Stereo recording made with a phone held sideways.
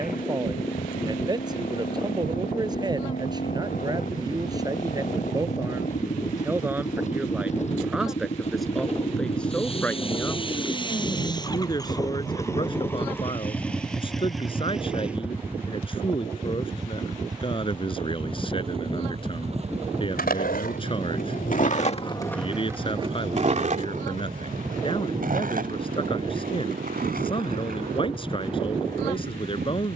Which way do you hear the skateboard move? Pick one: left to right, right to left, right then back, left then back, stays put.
left to right.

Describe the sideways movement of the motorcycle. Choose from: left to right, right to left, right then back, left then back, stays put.
left to right.